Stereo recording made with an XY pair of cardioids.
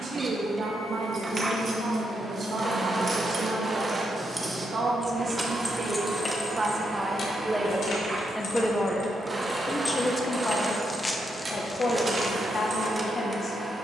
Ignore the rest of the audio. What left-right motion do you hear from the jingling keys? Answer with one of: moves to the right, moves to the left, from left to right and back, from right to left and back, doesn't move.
from right to left and back.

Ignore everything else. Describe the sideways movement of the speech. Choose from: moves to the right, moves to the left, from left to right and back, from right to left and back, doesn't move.
moves to the left.